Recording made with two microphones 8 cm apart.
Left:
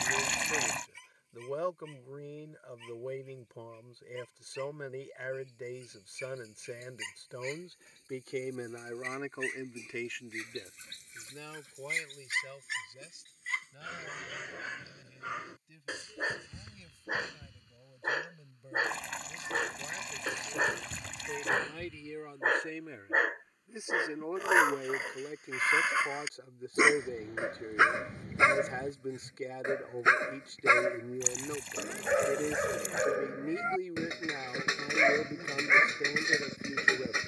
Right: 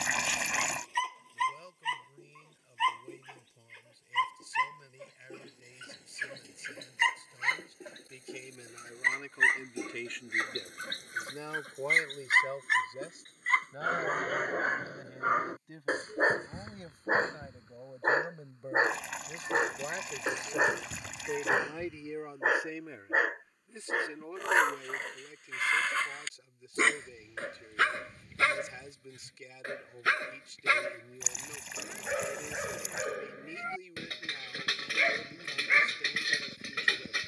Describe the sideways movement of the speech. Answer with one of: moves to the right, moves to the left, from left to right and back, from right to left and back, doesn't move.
from left to right and back.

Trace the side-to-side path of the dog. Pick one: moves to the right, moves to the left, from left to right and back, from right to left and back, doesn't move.
moves to the left.